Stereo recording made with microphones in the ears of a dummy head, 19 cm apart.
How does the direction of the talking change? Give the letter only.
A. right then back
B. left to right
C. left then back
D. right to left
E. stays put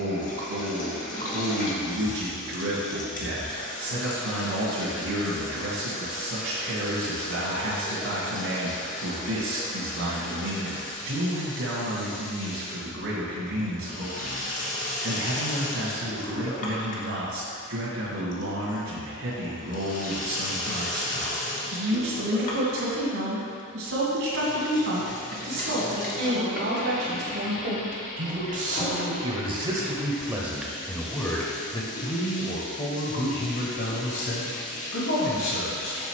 D.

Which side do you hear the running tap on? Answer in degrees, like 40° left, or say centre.
40° left.